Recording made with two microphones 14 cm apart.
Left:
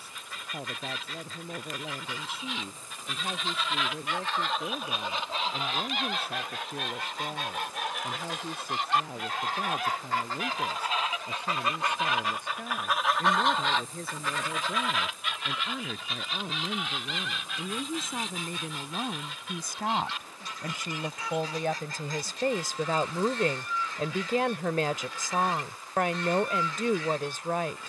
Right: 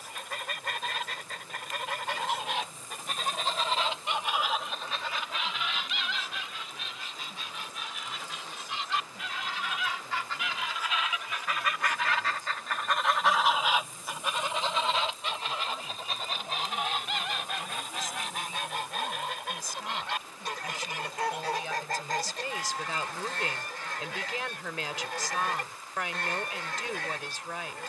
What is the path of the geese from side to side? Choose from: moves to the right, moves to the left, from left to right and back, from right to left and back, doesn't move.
from right to left and back.